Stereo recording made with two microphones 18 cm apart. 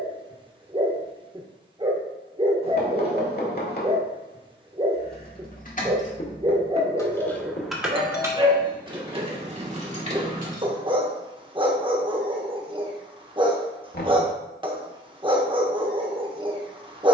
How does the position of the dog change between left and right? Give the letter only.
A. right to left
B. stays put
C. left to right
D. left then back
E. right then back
B.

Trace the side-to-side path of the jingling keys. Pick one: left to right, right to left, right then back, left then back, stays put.
left to right.